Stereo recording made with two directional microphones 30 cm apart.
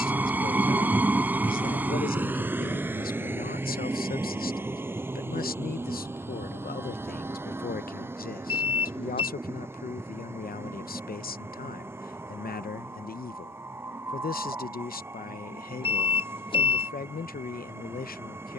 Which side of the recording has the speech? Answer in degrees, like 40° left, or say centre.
30° left.